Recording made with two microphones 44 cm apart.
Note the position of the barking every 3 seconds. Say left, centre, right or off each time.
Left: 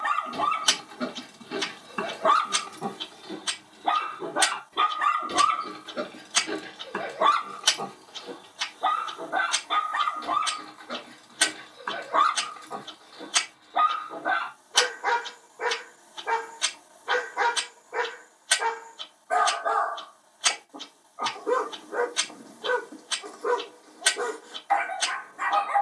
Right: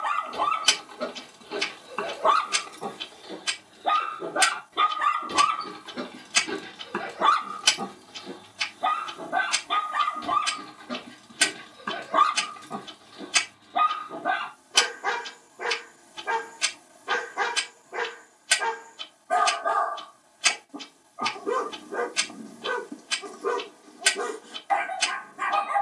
left, centre, right, right, right, right, right, right, right.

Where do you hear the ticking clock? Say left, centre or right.
right.